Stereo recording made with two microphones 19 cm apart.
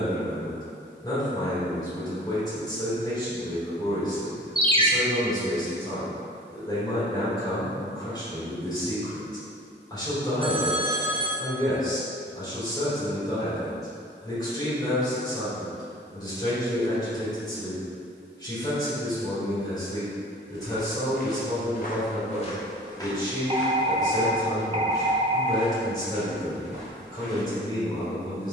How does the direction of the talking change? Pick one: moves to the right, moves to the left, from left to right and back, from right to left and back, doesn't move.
doesn't move.